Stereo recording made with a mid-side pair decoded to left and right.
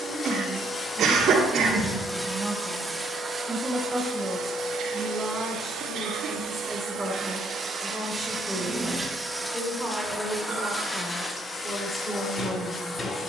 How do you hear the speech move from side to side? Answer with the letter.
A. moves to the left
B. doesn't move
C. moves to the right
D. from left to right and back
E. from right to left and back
A.